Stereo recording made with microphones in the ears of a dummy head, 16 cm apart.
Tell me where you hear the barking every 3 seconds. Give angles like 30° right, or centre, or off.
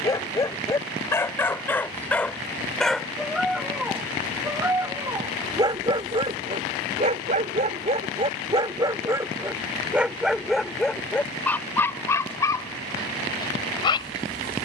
10° left, 10° right, 30° right, centre, 20° left.